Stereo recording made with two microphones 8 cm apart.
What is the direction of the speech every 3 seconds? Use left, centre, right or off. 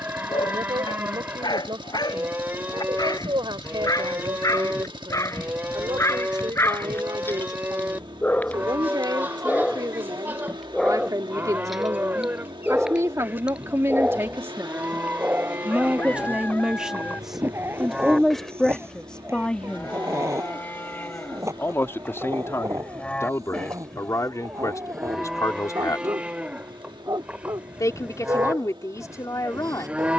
right, right, right, right, right, centre, centre, left, left, left.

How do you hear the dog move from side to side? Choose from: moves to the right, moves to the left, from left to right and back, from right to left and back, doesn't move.
moves to the right.